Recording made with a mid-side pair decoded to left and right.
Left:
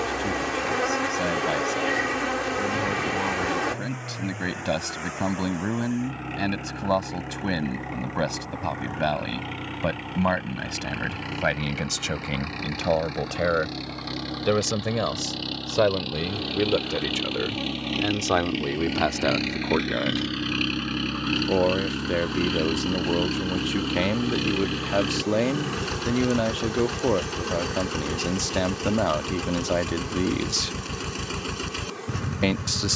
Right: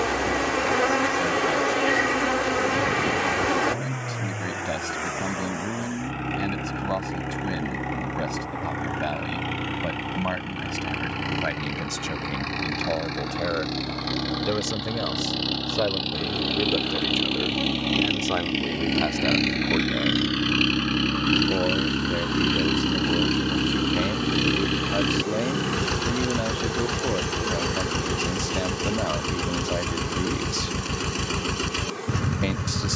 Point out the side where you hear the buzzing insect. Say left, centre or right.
right.